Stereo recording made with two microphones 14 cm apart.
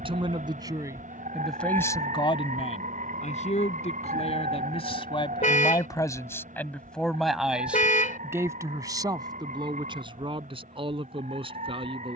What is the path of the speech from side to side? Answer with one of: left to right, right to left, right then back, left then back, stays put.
left then back.